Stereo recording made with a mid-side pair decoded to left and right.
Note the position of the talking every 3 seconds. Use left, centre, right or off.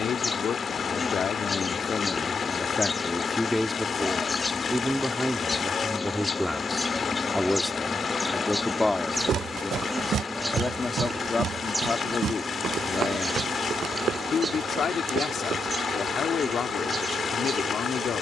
left, centre, centre, left, left, left.